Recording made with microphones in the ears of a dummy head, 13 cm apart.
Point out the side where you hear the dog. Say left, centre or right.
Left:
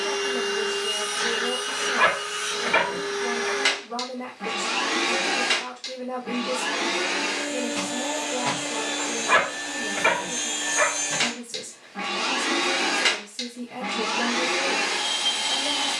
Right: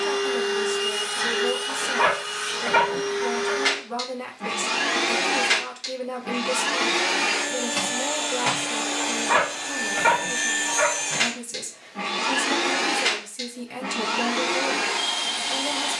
left.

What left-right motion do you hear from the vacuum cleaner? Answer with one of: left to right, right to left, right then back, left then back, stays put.
right then back.